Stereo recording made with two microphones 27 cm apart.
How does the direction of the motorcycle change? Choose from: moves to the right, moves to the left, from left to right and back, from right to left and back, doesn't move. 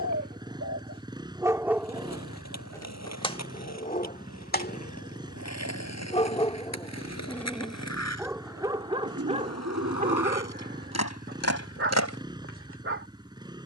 doesn't move.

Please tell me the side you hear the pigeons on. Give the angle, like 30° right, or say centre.
60° right.